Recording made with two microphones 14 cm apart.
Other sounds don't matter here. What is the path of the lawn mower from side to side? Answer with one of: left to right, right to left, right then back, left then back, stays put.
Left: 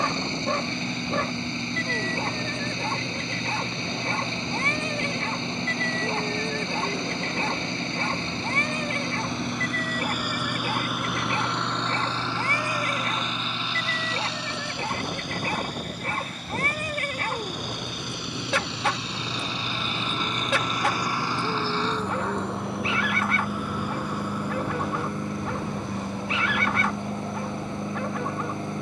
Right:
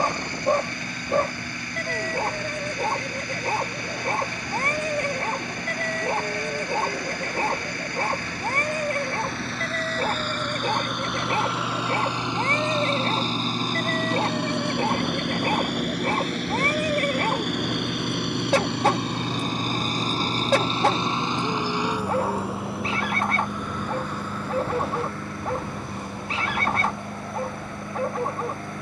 right then back.